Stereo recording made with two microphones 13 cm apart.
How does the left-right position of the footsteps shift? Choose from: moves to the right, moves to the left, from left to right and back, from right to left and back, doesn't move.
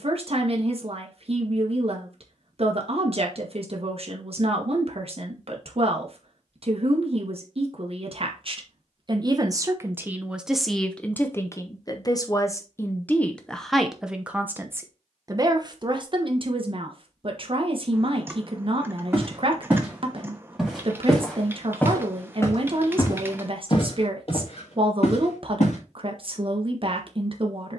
moves to the left.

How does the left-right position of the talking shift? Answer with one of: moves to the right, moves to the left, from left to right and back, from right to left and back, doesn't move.
from right to left and back.